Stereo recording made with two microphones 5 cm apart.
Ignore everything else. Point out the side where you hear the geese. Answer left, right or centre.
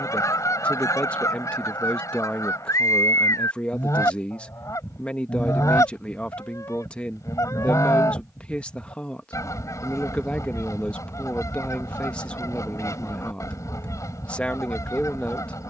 left.